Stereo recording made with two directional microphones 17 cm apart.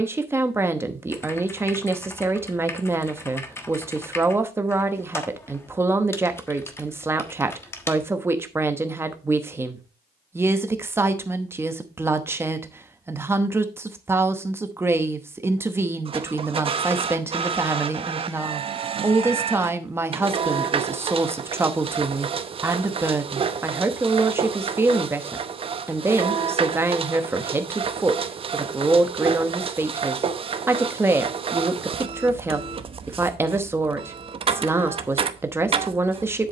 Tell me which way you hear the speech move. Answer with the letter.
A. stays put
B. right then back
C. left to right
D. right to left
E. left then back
A.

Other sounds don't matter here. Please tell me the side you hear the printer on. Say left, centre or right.
right.